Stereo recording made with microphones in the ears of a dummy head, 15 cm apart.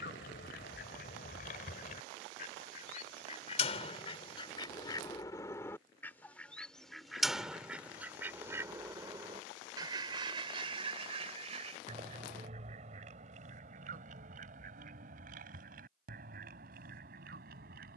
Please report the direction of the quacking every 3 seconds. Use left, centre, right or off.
left, left, centre, right, right, right.